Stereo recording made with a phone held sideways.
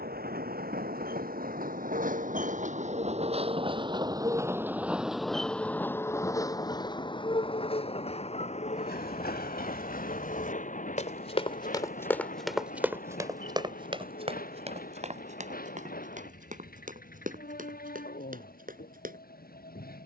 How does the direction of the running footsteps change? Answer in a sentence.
In this clip you hear the running footsteps move to the right.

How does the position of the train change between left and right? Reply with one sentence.
In this clip you hear the train move to the left.